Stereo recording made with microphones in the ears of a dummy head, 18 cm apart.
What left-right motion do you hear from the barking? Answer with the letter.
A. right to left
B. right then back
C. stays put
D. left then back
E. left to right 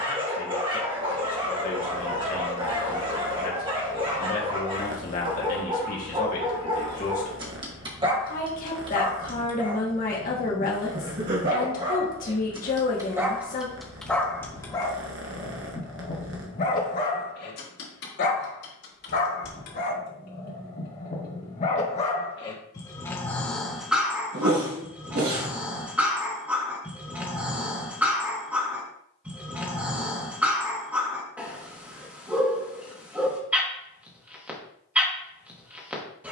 D.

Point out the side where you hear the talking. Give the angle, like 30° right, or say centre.
40° left.